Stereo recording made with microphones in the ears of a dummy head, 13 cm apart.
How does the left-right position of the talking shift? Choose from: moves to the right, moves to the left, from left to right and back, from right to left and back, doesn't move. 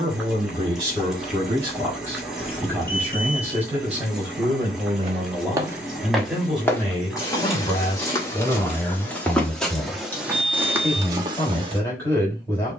moves to the left.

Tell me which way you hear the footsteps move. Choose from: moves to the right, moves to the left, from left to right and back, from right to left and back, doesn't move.
from right to left and back.